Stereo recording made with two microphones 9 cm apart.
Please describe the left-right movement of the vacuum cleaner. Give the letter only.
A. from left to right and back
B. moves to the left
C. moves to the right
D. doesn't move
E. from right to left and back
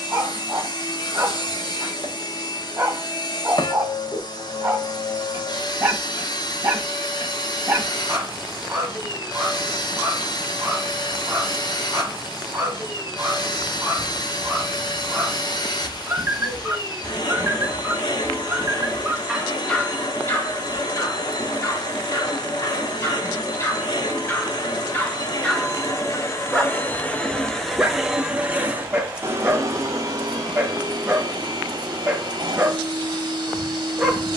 C.